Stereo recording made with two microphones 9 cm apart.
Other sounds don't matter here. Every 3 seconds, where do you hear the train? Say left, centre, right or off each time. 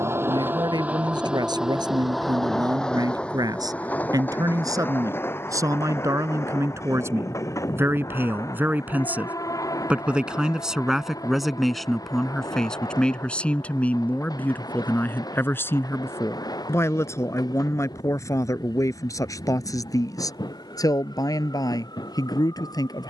centre, left, left, left, left, left, left, left.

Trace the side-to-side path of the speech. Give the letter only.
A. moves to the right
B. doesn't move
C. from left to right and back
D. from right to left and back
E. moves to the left
E.